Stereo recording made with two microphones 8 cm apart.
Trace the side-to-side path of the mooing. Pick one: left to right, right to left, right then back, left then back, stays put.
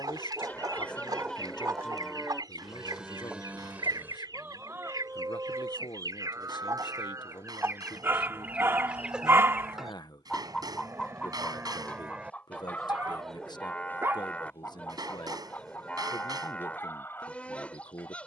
right then back.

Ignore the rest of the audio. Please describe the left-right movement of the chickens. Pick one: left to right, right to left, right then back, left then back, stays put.
right to left.